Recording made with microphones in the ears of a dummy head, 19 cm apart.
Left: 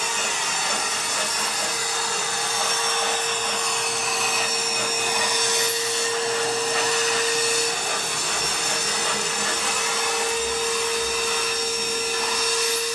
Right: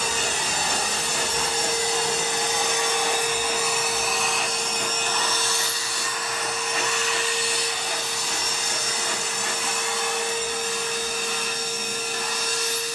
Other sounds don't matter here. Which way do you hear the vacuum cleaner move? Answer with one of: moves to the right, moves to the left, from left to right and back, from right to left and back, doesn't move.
moves to the left.